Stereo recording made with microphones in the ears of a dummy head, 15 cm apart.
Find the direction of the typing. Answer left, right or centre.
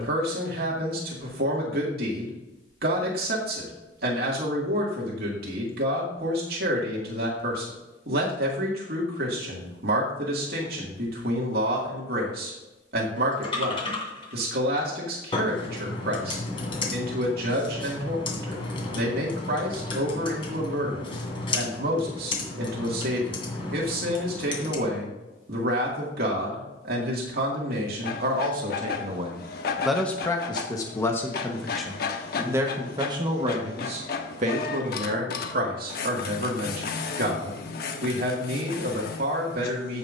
left.